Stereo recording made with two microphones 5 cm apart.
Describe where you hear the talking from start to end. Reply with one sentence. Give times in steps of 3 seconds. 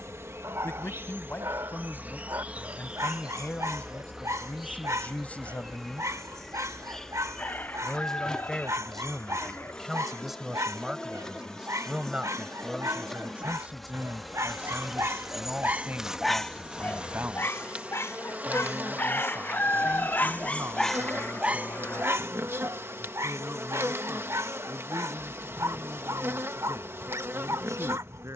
You can hear the talking on the left from 0 s, in the centre from 6 s and on the right from 12 s.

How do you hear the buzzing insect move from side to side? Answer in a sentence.
You can hear the buzzing insect move from right to left and back again.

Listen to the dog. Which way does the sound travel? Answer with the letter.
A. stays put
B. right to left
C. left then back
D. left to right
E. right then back
C.